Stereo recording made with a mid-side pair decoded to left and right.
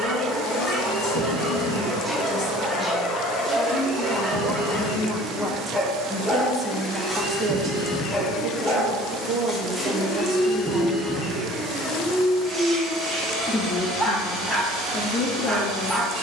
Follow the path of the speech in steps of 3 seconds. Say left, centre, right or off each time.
left, left, right, right, left, left.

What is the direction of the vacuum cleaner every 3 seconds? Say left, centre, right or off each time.
right, right, centre, centre, right, right.